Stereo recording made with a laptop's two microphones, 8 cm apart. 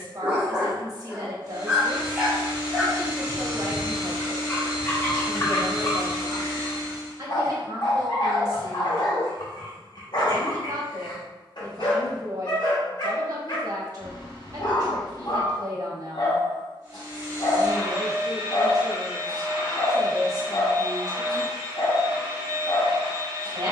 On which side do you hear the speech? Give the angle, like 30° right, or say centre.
50° right.